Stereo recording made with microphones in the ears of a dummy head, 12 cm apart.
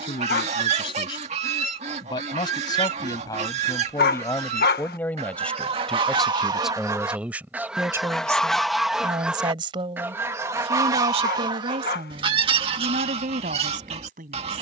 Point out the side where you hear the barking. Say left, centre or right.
left.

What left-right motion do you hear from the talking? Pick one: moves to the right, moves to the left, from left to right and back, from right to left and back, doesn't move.
moves to the right.